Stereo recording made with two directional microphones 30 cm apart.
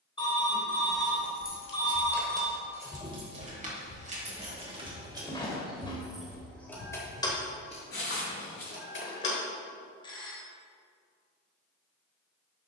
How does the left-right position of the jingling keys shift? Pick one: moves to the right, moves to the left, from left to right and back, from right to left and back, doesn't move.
from left to right and back.